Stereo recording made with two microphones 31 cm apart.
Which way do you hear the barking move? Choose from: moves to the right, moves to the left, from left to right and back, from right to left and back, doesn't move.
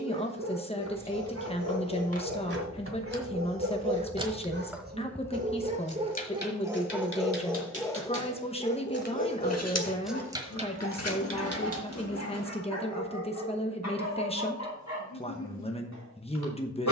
moves to the left.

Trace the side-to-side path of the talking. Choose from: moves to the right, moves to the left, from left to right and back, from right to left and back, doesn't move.
doesn't move.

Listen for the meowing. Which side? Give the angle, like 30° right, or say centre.
60° left.